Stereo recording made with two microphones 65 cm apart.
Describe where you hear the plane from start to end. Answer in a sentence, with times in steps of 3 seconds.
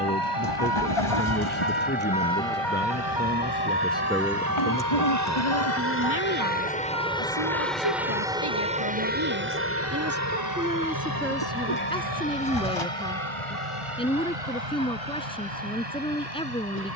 You can hear the plane on the left from 0 s, in the centre from 6 s and on the right from 9 s.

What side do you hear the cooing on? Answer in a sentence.
In this clip you hear the cooing on the left.